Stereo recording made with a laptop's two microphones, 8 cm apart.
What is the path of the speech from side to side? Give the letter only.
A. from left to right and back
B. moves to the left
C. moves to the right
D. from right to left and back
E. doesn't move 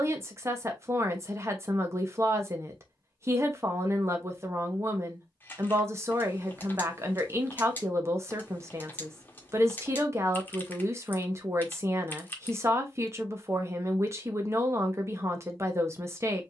E.